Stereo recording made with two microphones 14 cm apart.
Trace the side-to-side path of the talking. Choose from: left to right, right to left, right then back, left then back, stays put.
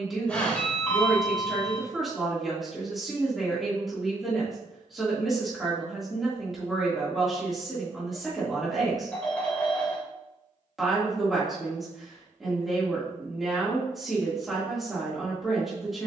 stays put.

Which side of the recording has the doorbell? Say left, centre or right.
centre.